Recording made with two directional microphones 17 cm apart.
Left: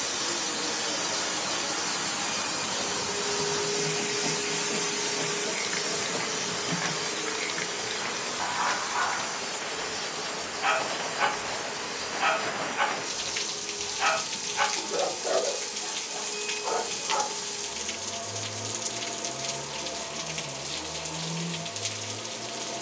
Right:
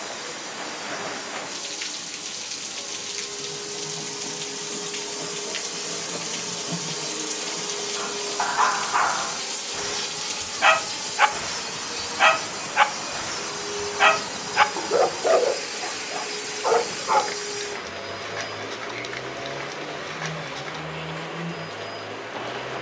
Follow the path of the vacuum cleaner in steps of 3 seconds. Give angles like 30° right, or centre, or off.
50° left, 20° left, 20° right, 50° right, 60° right, 60° right, 60° right, 60° right.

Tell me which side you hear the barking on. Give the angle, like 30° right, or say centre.
50° right.